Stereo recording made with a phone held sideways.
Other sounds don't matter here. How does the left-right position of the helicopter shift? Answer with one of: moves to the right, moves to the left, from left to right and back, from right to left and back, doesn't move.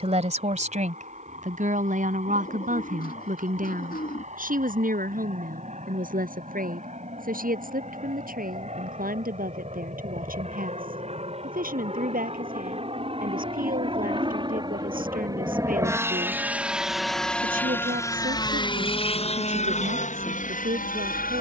moves to the left.